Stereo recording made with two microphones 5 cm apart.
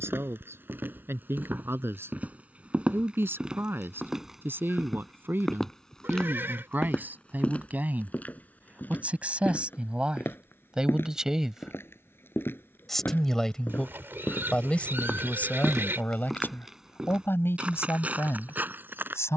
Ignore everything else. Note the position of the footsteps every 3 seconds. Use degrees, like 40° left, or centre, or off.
40° right, 10° right, 20° left, 40° left, 40° left, centre, 40° right.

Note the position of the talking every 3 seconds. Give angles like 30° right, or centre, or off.
50° right, 40° right, 30° right, 20° right, 20° left, 40° left, 60° left.